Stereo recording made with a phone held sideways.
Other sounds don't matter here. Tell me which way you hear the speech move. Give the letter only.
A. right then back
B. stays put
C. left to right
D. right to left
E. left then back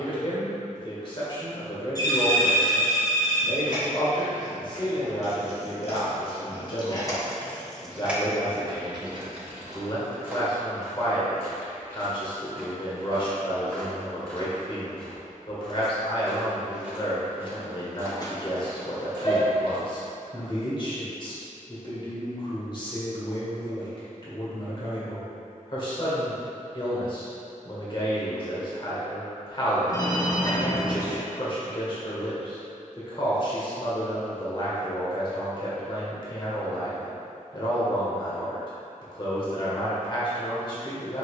B.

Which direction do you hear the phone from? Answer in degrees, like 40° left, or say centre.
30° left.